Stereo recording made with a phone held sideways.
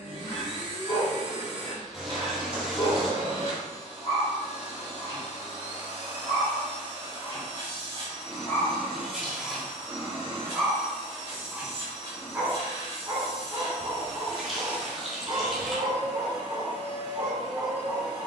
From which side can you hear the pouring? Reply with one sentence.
You can hear the pouring in the centre.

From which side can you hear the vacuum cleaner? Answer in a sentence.
In this clip you hear the vacuum cleaner on the right.